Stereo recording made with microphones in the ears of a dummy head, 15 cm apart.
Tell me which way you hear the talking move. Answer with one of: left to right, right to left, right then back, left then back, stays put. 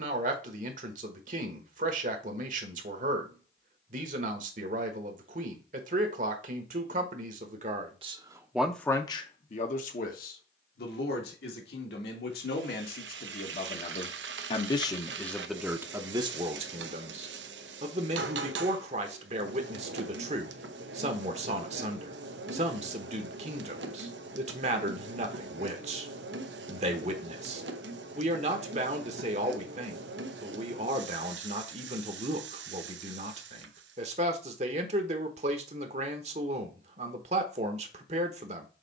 left then back.